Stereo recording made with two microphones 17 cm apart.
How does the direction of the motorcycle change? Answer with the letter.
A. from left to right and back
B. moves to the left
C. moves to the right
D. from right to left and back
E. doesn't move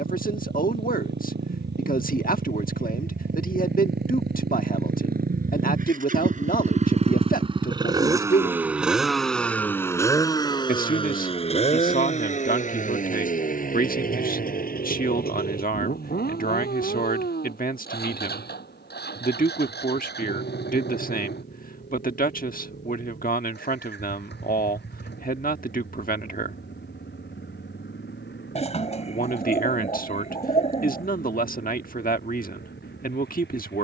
B.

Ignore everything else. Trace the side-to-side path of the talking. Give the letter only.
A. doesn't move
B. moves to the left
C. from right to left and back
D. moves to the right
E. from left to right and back
A.